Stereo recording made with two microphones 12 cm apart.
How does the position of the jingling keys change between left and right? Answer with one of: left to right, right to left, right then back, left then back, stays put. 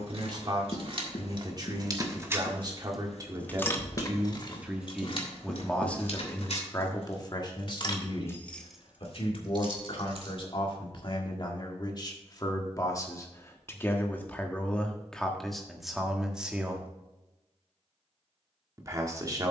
left then back.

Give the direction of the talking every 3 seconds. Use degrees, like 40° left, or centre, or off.
40° right, 10° right, 40° left, 50° left, 20° left, centre, 30° right.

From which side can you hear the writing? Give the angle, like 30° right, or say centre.
60° left.